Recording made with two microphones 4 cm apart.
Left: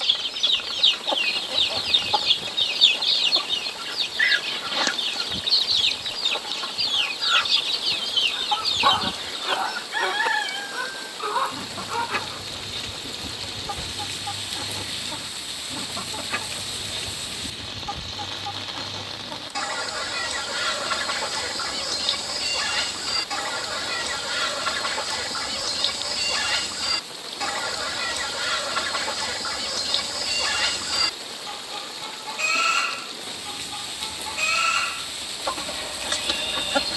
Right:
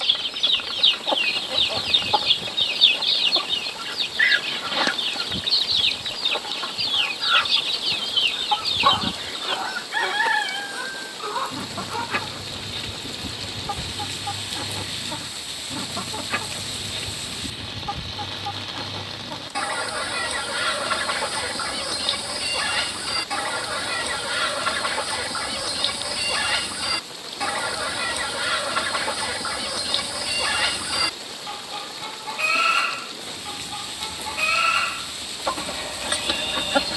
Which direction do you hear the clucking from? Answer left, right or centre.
centre.